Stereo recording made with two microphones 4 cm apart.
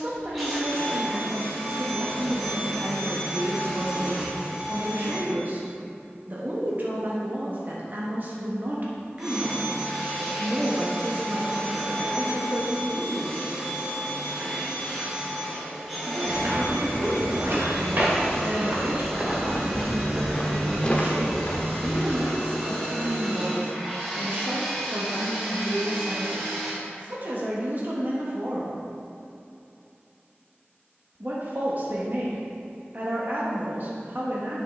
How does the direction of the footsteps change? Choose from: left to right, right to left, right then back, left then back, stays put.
right to left.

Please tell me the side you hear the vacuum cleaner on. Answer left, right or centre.
centre.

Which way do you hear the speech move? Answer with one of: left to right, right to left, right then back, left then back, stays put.
stays put.